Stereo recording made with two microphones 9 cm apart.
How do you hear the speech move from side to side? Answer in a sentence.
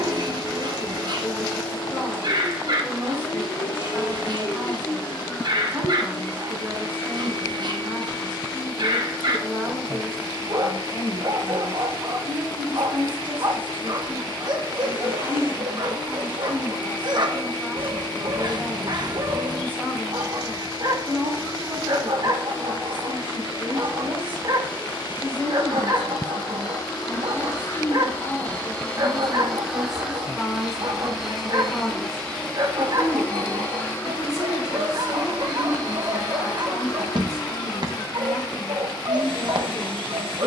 In this clip you hear the speech go from the right side to the left.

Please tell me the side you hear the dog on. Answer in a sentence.
In this clip you hear the dog on the right.